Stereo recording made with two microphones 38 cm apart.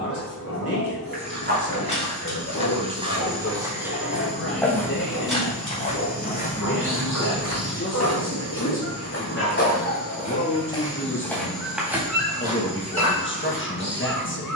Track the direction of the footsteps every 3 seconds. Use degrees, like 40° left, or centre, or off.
20° right, centre, 40° left, 20° left, 20° right.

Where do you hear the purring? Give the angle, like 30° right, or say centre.
60° left.